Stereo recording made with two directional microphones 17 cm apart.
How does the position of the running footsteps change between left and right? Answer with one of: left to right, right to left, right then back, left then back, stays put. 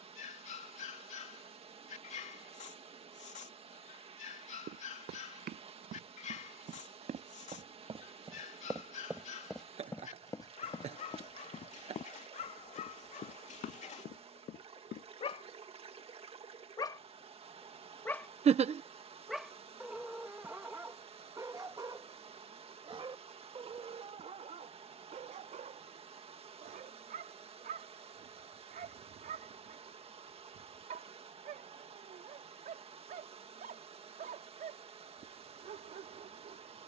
right to left.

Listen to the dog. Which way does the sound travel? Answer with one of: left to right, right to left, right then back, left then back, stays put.
left to right.